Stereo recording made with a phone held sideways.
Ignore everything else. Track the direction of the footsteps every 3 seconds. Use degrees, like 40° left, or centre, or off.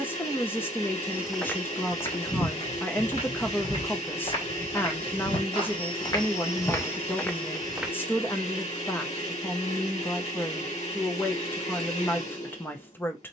20° left, 40° left, 20° left, off, off.